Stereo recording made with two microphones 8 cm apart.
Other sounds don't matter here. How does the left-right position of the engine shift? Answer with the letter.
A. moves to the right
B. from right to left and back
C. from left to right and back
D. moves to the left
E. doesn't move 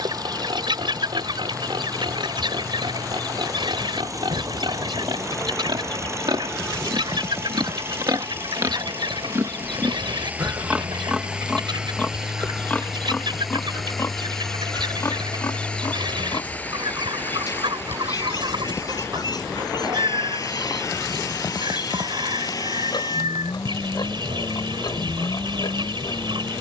D.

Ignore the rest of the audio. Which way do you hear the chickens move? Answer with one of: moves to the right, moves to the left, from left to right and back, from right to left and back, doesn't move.
doesn't move.